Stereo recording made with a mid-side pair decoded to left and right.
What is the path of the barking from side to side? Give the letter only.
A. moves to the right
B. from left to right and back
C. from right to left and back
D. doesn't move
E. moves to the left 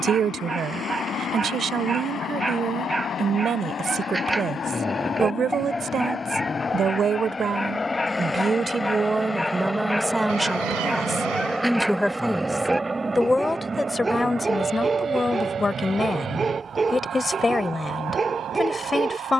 C.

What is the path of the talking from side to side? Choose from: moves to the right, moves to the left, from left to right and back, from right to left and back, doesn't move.
moves to the left.